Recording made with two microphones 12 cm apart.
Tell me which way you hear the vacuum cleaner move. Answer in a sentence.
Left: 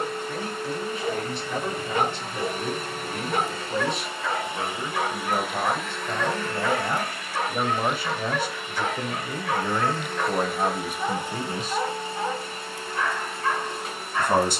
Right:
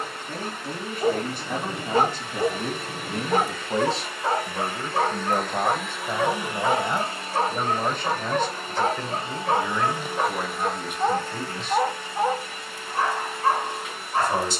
In this clip you hear the vacuum cleaner go right and come back.